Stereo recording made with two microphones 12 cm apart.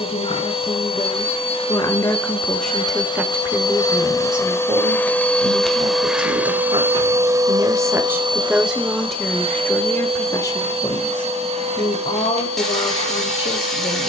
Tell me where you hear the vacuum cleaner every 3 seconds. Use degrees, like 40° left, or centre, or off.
50° left, 20° left, 30° right, 60° right, 70° right.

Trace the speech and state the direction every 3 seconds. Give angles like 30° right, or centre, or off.
30° left, 40° right, 30° right, 30° left, 50° left.